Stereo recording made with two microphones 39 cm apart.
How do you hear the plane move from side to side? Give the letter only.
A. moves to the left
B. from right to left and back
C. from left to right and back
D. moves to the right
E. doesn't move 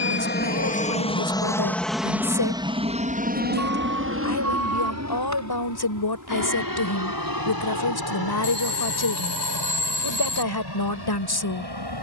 D.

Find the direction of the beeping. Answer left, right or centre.
right.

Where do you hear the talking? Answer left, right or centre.
left.